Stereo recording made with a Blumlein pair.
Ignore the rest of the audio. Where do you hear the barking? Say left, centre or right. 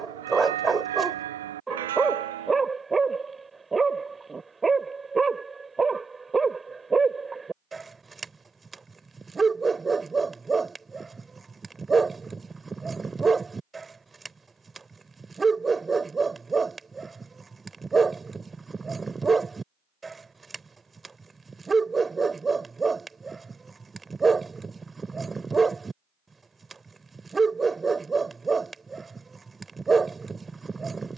centre.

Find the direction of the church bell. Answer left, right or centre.
right.